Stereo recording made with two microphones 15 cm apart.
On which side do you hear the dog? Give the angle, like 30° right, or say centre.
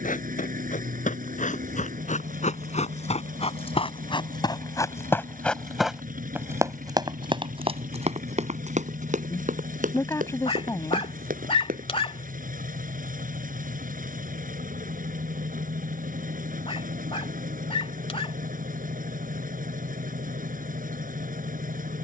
40° left.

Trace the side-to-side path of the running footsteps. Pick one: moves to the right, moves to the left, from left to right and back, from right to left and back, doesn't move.
moves to the right.